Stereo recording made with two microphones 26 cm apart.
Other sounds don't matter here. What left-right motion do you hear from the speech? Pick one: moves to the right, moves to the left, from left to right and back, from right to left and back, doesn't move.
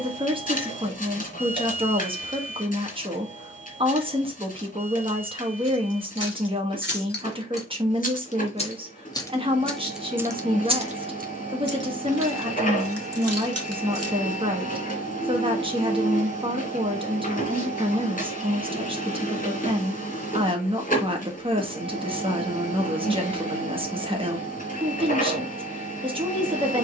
doesn't move.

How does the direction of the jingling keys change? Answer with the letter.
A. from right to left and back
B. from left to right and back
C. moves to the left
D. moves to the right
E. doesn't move
D.